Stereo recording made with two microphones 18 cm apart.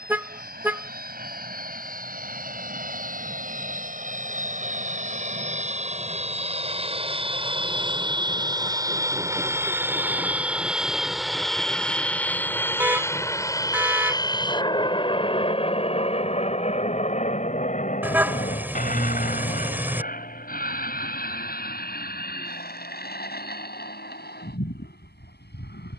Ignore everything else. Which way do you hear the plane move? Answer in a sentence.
You can hear the plane move from right to left.